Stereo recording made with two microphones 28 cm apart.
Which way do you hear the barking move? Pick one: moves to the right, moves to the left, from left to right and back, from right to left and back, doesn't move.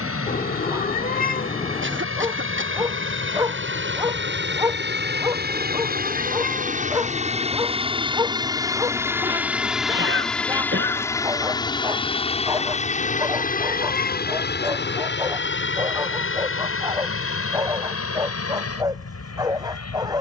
doesn't move.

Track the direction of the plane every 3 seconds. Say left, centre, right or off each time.
right, right, right, centre, left, left, left.